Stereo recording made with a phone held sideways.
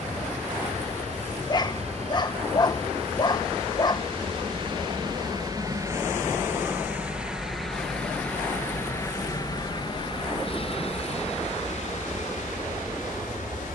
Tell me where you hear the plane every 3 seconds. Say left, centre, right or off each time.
right, right, centre, left, left.